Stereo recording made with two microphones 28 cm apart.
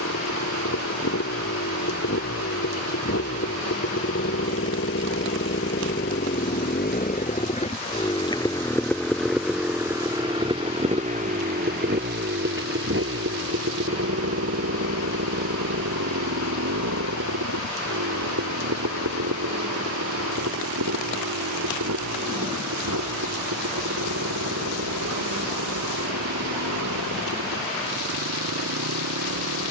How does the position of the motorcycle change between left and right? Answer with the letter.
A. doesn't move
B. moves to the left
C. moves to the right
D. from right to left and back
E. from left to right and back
C.